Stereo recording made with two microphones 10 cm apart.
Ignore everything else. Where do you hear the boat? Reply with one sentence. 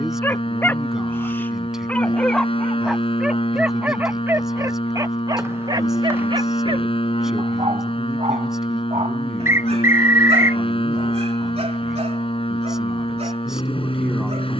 In this clip you hear the boat on the left.